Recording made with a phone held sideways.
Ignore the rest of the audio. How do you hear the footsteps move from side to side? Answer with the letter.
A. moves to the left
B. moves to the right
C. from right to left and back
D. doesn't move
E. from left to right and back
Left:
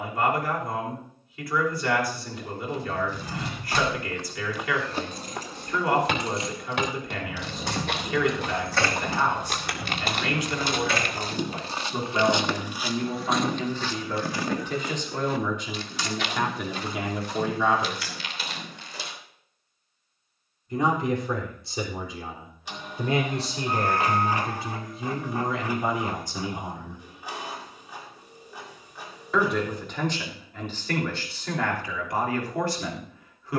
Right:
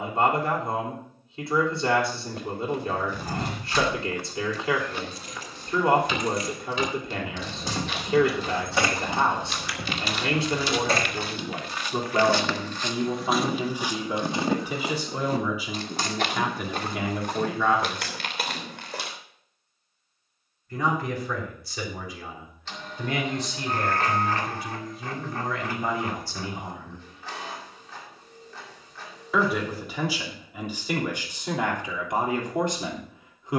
C.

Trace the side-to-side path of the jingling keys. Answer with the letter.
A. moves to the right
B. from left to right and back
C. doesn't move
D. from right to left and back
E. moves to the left
A.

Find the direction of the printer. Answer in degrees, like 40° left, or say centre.
10° left.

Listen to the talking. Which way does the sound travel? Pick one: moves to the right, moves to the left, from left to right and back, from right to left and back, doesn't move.
from right to left and back.